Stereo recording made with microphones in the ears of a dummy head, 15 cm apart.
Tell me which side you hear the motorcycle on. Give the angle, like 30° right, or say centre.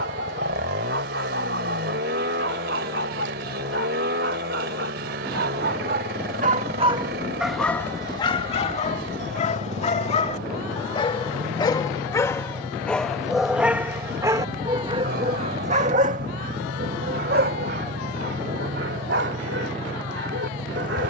60° right.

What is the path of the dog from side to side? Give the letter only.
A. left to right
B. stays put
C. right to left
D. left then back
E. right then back
D.